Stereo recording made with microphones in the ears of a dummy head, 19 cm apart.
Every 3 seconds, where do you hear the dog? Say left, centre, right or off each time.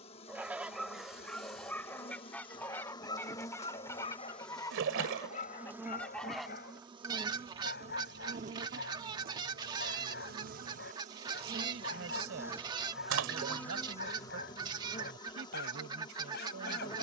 centre, left, left, left, left, left.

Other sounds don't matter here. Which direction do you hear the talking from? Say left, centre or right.
right.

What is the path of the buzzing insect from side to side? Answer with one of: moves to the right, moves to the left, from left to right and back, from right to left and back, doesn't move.
from left to right and back.